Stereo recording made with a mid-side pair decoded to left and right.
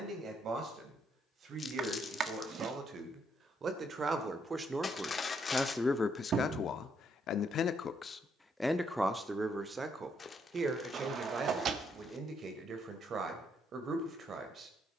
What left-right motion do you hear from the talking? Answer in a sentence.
In this clip you hear the talking go left and come back.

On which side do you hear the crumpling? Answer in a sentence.
In this clip you hear the crumpling on the left.